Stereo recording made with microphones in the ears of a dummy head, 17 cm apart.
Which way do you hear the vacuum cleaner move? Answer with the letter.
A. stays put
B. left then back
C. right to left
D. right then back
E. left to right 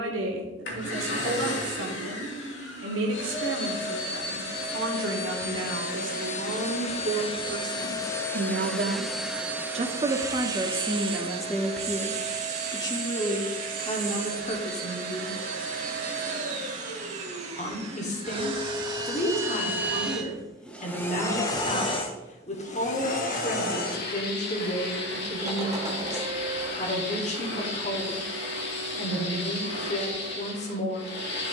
D.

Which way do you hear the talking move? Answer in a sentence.
You can hear the talking move from right to left.